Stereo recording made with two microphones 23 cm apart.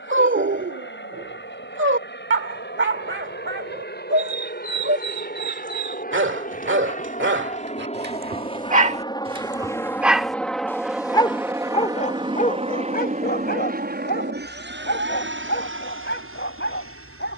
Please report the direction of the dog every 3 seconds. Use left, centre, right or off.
right, right, right, centre, left, left.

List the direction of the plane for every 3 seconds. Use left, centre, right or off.
left, left, left, centre, right, right.